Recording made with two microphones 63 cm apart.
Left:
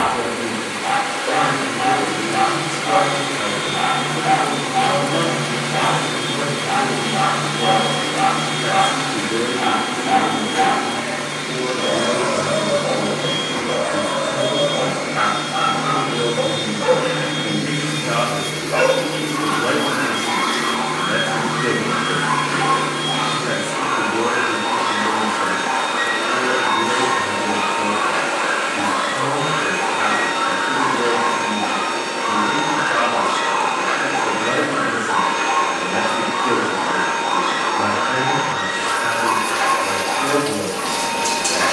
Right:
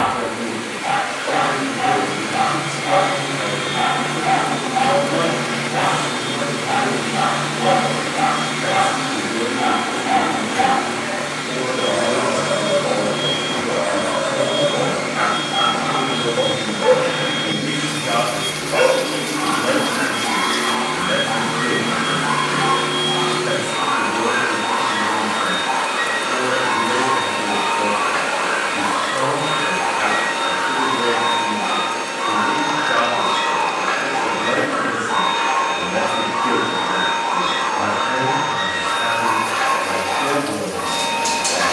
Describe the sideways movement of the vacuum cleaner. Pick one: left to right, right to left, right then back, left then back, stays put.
right then back.